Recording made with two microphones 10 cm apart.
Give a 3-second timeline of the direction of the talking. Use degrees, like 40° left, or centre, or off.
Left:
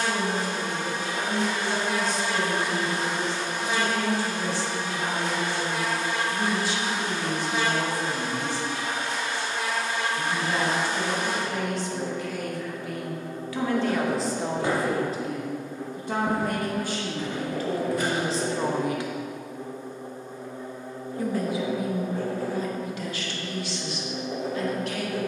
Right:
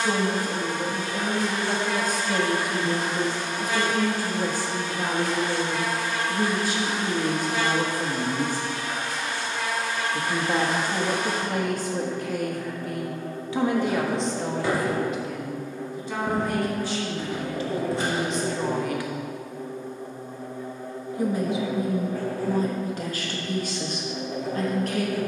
50° right, 50° right, 50° right, 50° right, 20° right, 50° left, 30° left, 30° right, 40° right.